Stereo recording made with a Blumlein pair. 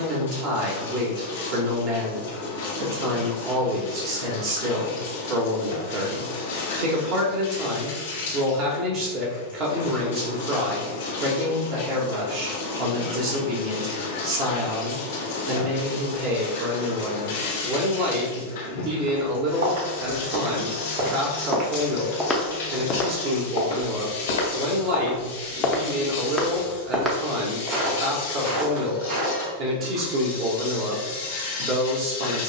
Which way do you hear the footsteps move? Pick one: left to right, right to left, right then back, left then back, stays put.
left then back.